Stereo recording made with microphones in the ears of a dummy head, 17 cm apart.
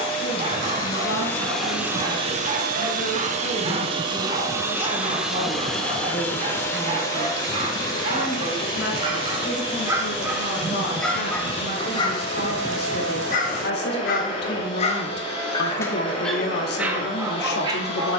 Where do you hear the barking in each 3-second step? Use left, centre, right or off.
right, right, right, centre, left, centre.